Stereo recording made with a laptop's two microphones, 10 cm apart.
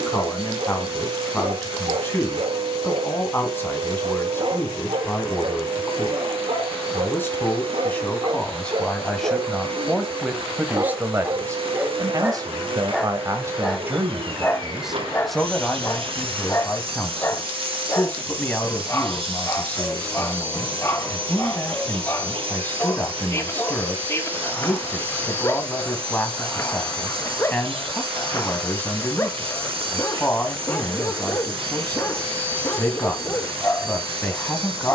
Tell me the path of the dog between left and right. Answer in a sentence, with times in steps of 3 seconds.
You can hear the dog on the right from 0 s, in the centre from 12 s and on the left from 15 s.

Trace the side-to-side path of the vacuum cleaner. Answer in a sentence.
In this clip you hear the vacuum cleaner stay put.